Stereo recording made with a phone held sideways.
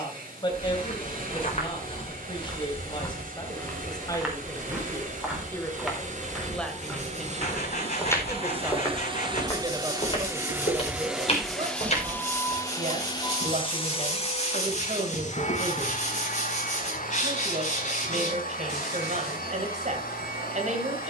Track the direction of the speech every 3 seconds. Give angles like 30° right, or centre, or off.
30° left, 20° left, centre, 30° right, 50° right, 50° right, 50° right.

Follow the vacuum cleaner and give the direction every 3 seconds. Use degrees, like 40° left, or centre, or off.
70° right, 60° right, 50° right, 10° right, 30° left, 60° left, 70° left.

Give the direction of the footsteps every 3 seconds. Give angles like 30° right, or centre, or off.
40° left, centre, 10° left, 40° left, 50° left, off, off.